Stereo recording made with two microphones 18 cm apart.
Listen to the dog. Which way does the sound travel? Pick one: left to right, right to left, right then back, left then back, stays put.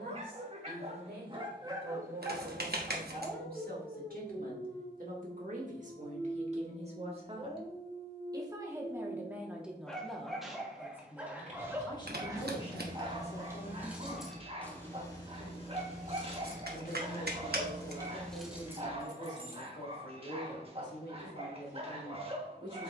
left then back.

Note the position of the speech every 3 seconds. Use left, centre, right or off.
right, right, right, centre, left, left, left, left.